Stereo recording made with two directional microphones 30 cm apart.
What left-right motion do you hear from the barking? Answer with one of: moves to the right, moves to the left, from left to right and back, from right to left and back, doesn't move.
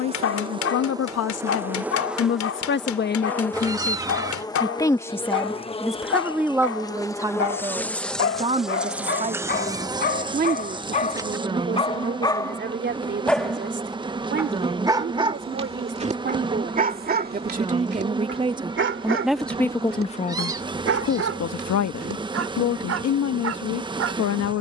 moves to the right.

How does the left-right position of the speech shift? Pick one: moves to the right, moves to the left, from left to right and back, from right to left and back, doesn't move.
from left to right and back.